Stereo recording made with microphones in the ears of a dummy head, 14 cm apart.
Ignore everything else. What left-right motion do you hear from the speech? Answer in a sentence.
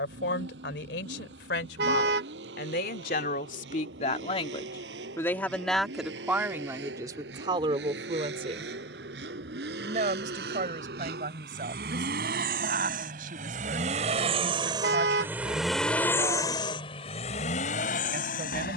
You can hear the speech move to the right.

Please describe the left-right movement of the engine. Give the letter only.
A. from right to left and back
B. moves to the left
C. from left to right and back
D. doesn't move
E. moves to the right
B.